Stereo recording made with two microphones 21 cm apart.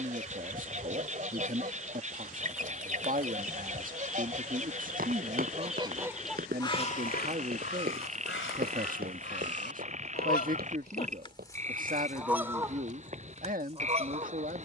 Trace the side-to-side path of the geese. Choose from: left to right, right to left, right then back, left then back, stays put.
left then back.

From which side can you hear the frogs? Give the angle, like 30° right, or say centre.
30° right.